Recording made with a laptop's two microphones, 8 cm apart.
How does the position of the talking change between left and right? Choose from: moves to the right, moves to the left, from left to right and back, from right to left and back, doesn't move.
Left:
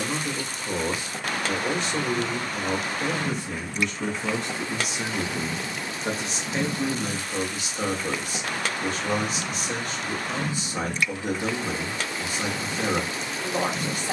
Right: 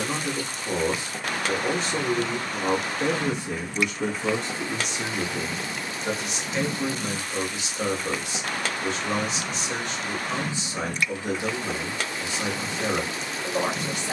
moves to the left.